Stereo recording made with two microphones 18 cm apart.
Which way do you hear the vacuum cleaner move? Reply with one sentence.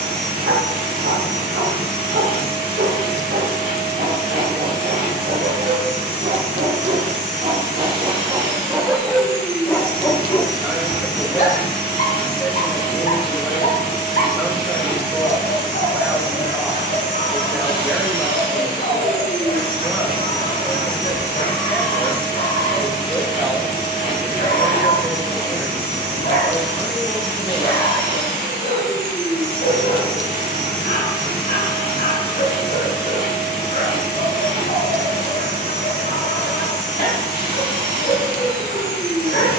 In this clip you hear the vacuum cleaner stay in one place.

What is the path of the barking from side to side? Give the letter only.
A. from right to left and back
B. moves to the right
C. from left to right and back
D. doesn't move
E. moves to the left
E.